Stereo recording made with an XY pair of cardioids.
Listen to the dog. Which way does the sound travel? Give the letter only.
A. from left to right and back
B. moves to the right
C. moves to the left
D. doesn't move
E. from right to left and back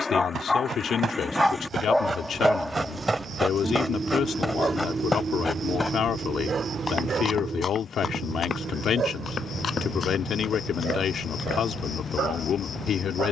B.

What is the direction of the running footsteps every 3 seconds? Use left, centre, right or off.
right, centre, left, left, off.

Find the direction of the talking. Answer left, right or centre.
left.